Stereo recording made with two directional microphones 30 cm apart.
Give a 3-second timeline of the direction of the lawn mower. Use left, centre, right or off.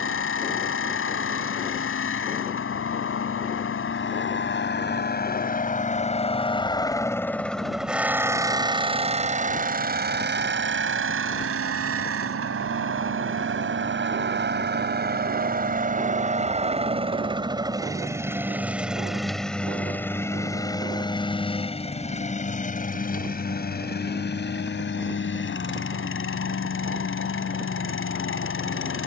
left, left, centre, right, right, right, centre, left, left, left.